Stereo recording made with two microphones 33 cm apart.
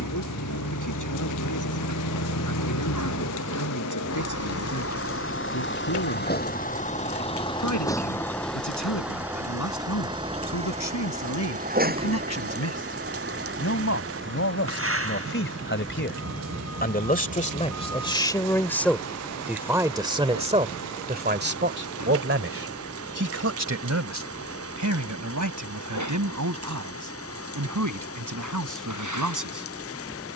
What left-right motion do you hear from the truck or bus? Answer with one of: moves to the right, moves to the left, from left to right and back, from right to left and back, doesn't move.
moves to the right.